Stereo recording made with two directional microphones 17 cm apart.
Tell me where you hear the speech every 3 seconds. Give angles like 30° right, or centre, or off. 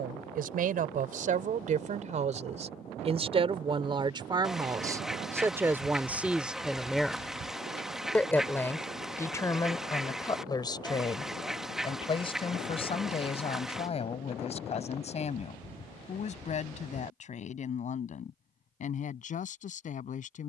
50° right, 20° right, centre, 20° left, 40° left, 40° left, 50° left.